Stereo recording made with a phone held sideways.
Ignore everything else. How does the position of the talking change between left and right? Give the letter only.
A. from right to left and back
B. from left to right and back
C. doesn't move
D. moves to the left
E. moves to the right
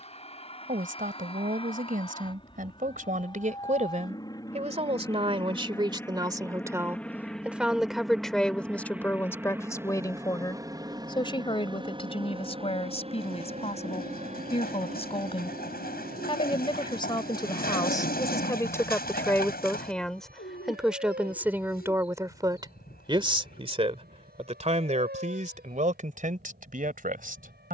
A.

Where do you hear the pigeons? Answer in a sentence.
You can hear the pigeons on the left.